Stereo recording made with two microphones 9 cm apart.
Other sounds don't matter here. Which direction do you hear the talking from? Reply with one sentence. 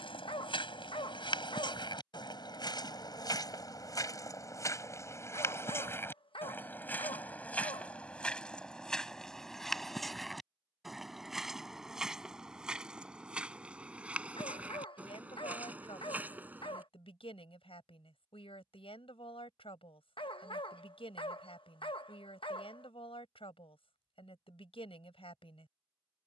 In this clip you hear the talking on the left.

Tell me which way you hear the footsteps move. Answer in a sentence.
You can hear the footsteps move to the right.